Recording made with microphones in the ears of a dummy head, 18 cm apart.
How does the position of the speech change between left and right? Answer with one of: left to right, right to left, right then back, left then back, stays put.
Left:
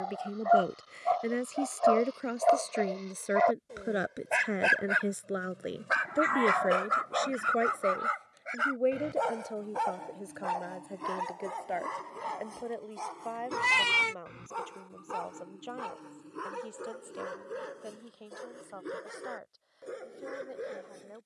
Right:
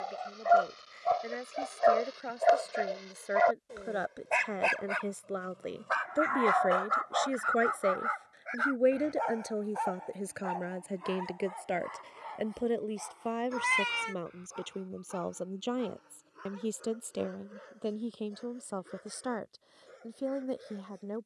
left to right.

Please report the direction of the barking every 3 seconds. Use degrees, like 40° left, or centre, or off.
30° right, 10° left, 40° left, 60° left, 70° left, 70° left, 70° left.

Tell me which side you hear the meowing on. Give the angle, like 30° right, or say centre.
50° left.